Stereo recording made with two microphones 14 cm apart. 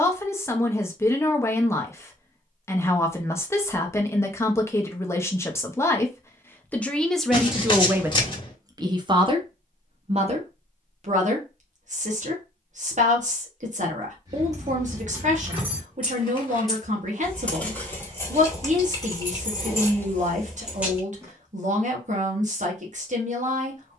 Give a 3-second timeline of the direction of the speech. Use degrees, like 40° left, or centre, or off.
20° left, 20° left, 10° right, 50° right, 60° right, 60° right, 60° right, 60° right.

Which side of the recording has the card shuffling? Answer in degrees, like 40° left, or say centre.
30° left.